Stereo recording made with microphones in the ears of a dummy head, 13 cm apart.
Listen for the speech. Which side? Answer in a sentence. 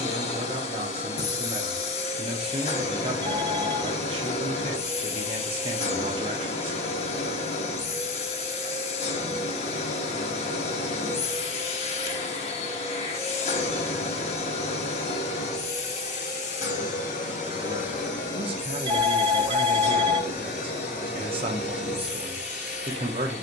You can hear the speech on the right.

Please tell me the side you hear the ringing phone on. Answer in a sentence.
In this clip you hear the ringing phone on the right.